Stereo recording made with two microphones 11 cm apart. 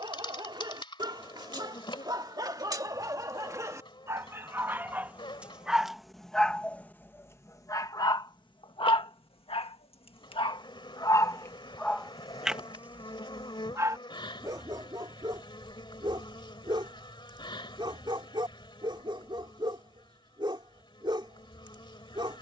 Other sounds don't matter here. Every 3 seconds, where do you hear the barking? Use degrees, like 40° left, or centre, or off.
40° right, 20° right, 20° left, 40° left, 20° right, 40° right, 50° right, 50° right.